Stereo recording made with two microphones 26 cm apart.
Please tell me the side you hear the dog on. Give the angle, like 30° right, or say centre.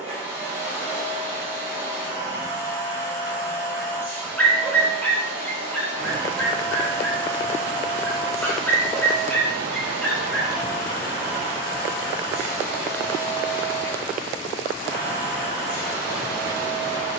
10° left.